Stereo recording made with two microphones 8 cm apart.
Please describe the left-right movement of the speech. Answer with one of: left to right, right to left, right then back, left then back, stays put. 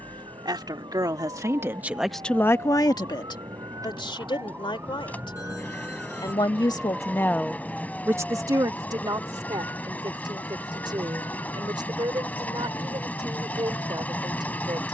left then back.